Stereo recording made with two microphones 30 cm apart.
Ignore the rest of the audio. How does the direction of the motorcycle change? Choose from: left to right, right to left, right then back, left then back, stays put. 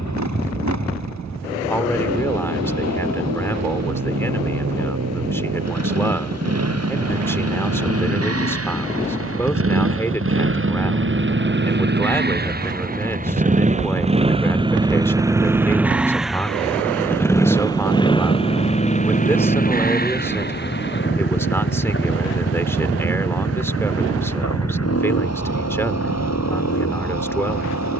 right to left.